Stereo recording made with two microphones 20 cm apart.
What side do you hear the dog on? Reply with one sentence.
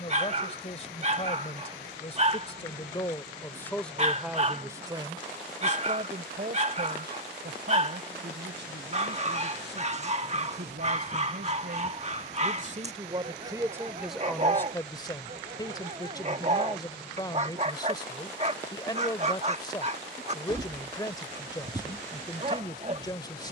In this clip you hear the dog on the right.